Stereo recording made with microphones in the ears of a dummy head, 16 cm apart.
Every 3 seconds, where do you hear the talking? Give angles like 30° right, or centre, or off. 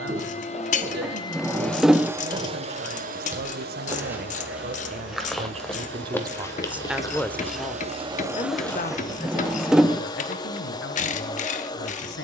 60° right, 50° right, 10° left, 60° left.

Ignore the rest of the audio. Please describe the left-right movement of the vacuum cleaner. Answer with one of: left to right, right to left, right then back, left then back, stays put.
right then back.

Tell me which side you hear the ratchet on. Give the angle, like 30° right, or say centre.
40° left.